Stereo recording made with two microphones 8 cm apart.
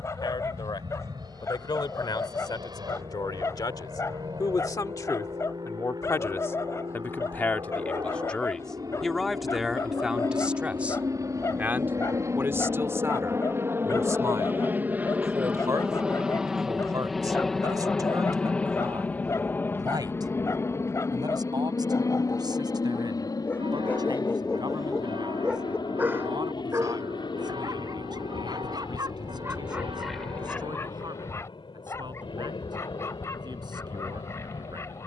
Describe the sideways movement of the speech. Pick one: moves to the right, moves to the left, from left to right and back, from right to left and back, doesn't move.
moves to the right.